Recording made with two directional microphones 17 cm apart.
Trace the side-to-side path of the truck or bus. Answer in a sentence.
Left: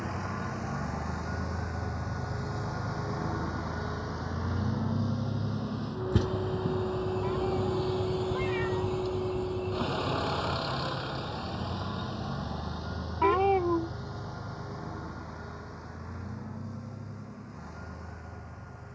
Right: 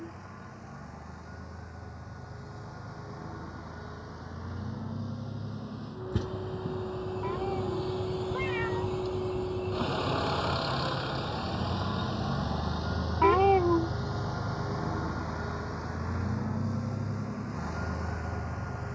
In this clip you hear the truck or bus go from the left side to the right.